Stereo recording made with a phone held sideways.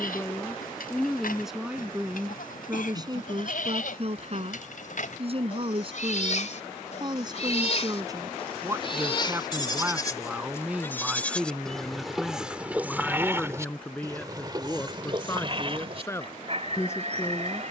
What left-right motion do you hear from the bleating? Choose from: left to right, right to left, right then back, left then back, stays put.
left to right.